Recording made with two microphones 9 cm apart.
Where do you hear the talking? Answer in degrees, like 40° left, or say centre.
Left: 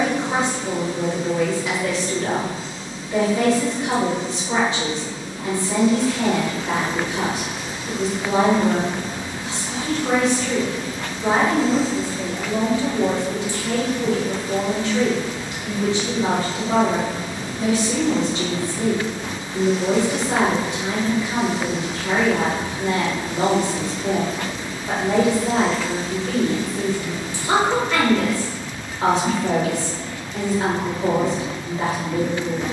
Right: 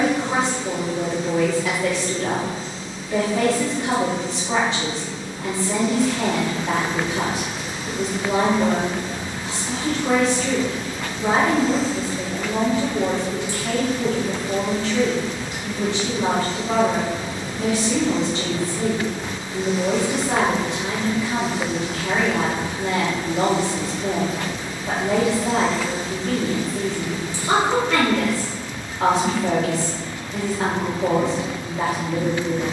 90° right.